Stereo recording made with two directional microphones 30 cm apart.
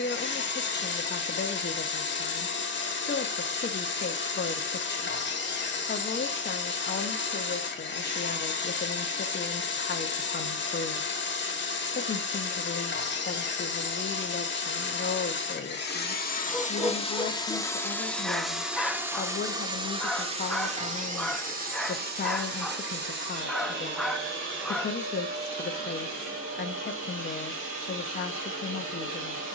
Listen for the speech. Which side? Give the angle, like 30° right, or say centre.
30° left.